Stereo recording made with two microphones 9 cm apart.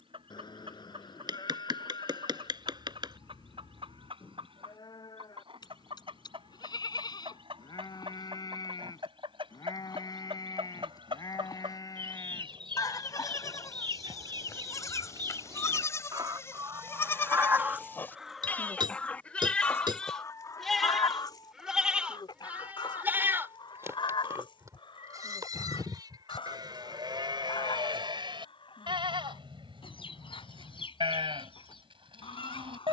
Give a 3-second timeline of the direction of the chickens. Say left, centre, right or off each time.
right, right, right, right, right, right, left, left, left, left, left.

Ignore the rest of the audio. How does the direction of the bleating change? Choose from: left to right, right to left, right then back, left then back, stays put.
left to right.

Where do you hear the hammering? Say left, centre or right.
right.